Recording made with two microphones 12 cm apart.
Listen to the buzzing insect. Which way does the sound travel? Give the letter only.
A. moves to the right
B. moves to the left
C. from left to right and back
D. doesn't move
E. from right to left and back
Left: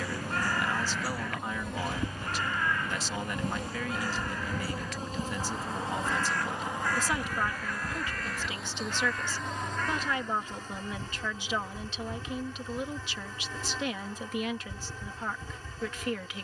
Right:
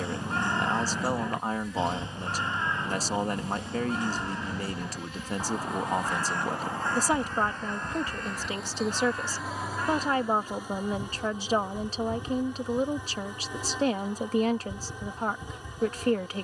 A.